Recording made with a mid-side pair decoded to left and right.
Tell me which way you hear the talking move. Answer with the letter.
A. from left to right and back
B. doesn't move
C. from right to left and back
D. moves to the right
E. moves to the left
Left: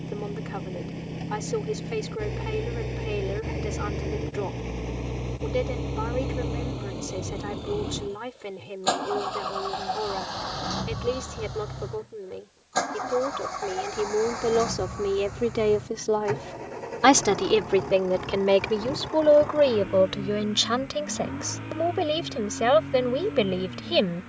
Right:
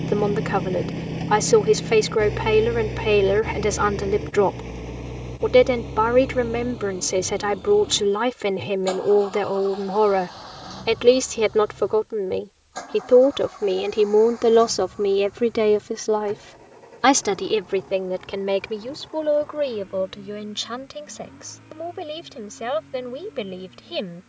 E.